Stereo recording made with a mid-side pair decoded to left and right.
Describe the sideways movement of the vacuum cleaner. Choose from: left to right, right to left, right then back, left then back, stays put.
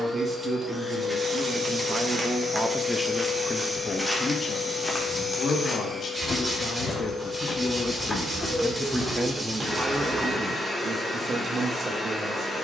stays put.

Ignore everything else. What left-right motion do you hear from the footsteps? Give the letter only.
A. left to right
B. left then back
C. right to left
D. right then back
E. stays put
B.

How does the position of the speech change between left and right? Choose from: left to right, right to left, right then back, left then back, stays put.
left then back.